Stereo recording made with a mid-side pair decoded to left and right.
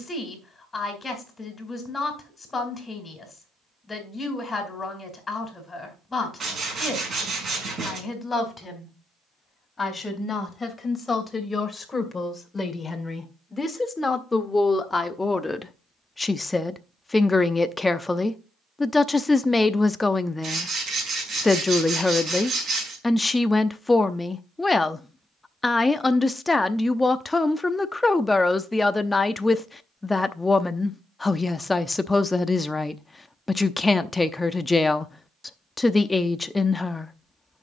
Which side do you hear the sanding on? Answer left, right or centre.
right.